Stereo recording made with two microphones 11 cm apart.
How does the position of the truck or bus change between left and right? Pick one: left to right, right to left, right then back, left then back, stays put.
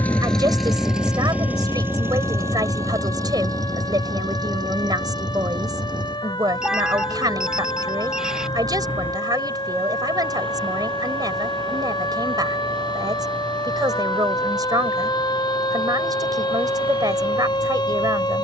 left to right.